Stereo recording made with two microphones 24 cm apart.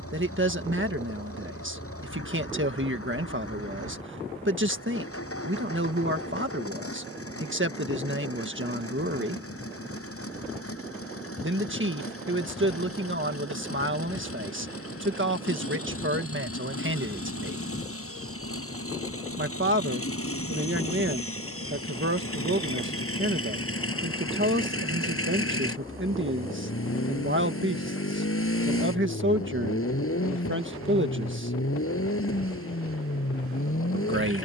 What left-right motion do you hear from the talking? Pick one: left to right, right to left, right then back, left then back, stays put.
stays put.